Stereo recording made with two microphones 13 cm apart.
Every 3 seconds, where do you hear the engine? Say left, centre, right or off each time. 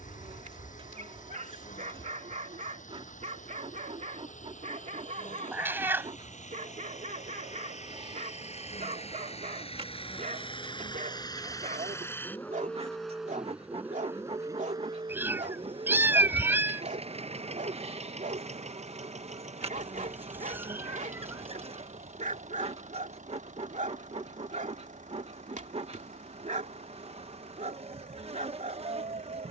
left, left, left, left, centre, right, right, right, right, right.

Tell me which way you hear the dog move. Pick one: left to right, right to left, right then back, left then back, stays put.
stays put.